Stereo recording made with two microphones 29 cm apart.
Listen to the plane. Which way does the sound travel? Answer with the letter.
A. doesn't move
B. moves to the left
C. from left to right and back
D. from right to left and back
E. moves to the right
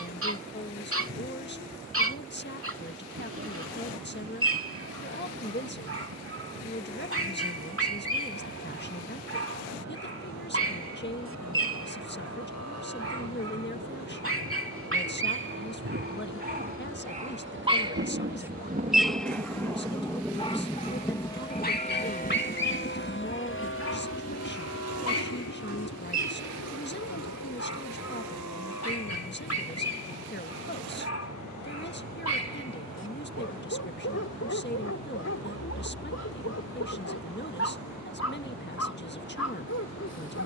B.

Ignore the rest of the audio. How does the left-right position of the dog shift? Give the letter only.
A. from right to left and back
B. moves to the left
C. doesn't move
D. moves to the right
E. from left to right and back
B.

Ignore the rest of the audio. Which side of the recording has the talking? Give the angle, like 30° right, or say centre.
40° left.